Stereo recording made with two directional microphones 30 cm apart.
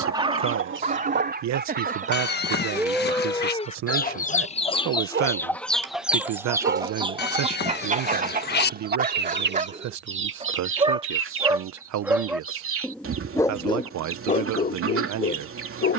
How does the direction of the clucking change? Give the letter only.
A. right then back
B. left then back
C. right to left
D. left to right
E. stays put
B.